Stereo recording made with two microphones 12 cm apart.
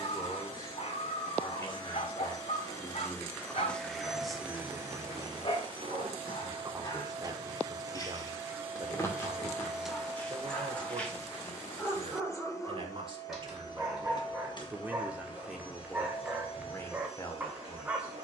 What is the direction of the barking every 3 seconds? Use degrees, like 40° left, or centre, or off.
60° left, 60° left, 40° left, 20° left, centre, 10° right.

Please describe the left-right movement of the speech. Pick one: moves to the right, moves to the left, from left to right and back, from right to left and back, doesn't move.
from left to right and back.